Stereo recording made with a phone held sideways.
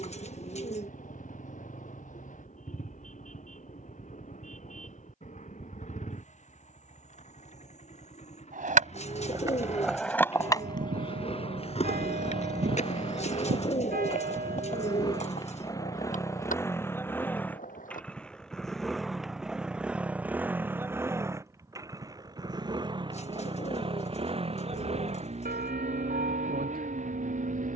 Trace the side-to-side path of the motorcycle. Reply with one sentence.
You can hear the motorcycle go from the left side to the right.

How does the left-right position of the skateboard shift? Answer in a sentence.
In this clip you hear the skateboard move to the left.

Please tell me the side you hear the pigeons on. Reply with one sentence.
You can hear the pigeons on the left.